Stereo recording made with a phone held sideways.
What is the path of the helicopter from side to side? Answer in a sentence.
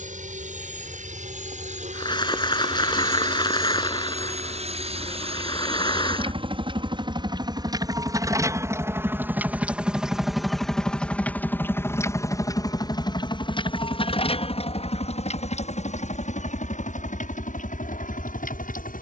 In this clip you hear the helicopter move from right to left.